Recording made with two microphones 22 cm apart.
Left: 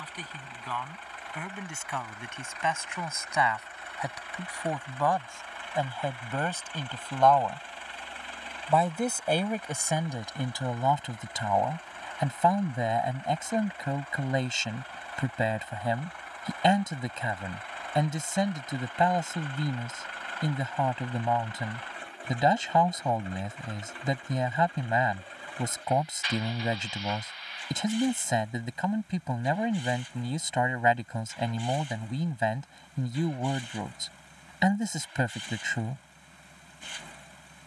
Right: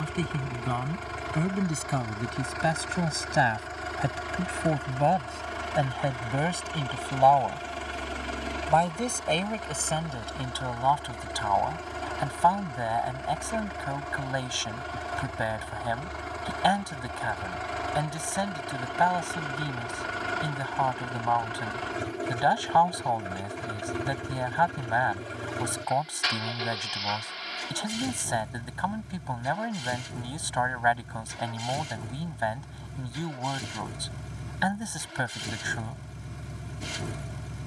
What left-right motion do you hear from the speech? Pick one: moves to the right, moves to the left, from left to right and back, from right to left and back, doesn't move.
moves to the left.